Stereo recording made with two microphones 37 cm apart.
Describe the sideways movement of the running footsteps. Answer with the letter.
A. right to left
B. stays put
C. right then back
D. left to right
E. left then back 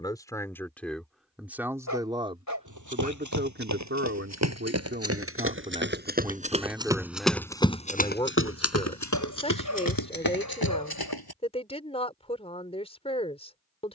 A.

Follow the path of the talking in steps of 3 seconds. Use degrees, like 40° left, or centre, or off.
centre, 30° right, centre, 20° left, 20° left.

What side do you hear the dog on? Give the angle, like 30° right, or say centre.
50° left.